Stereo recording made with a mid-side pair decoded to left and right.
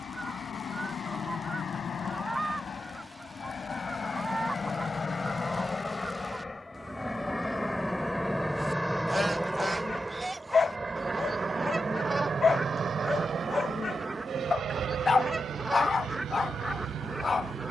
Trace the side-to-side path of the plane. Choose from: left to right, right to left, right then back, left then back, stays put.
left to right.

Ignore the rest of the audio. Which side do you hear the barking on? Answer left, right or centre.
left.